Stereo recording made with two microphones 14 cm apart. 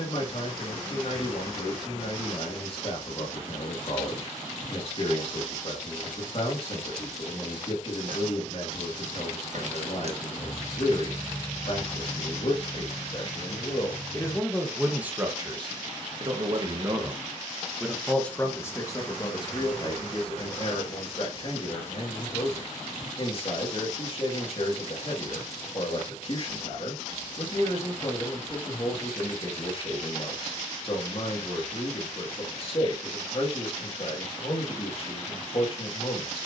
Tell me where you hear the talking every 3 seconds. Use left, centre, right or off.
left, left, left, left, left, right, left, left, left, left, left, left.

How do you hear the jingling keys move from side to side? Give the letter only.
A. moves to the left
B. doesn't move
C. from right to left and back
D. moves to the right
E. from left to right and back
A.